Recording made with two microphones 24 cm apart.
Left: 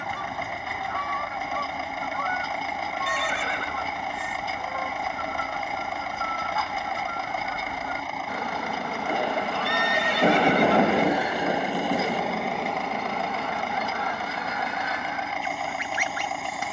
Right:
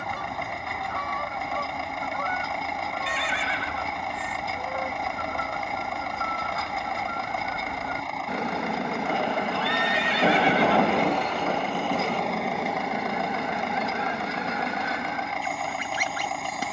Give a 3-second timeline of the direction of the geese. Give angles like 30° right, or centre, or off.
40° right, 40° right, 30° right, centre, 20° right, 40° right.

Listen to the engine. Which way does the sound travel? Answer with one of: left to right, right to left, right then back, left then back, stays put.
stays put.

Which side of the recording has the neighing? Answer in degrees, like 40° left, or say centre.
40° left.